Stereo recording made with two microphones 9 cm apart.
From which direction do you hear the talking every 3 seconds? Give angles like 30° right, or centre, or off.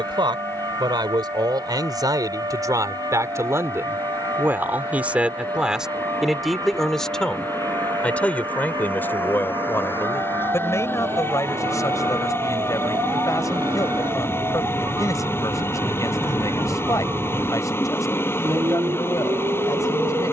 50° right, 20° right, 10° left, 30° left, 40° left, 40° left, 40° left.